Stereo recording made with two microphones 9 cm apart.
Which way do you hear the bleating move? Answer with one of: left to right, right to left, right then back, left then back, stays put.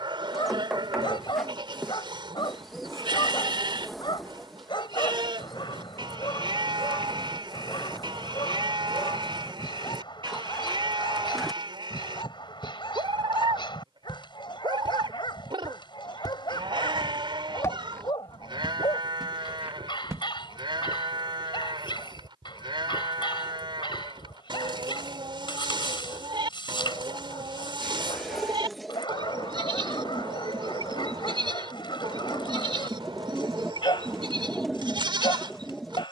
stays put.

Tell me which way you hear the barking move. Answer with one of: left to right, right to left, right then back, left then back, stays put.
stays put.